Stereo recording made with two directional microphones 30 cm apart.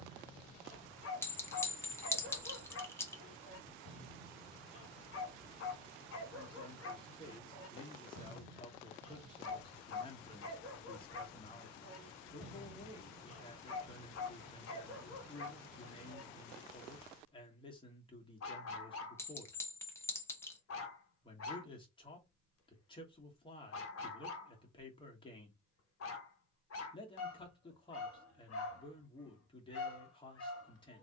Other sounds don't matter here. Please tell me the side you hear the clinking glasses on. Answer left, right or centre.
centre.